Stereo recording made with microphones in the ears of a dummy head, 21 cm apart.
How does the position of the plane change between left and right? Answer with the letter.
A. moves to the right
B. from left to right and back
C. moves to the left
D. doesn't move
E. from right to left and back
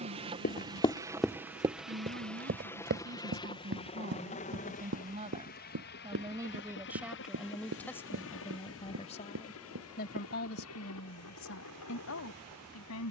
C.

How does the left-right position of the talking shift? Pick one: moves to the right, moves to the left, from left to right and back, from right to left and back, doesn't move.
moves to the left.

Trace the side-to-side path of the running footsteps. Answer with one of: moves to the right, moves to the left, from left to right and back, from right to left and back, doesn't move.
moves to the right.